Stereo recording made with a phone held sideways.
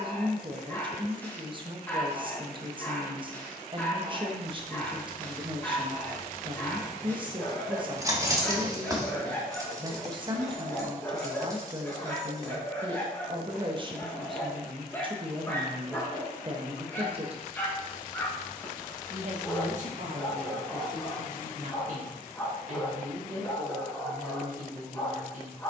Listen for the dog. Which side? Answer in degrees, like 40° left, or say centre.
10° left.